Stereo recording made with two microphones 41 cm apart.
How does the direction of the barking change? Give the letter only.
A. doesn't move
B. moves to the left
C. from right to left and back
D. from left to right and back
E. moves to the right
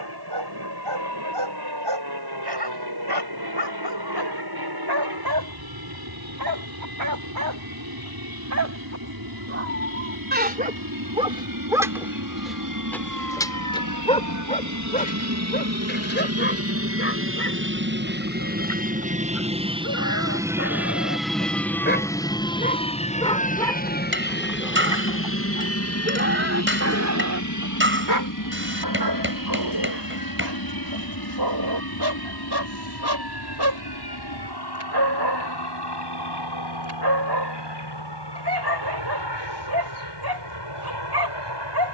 C.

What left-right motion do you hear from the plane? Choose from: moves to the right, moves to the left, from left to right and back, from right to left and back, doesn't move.
moves to the left.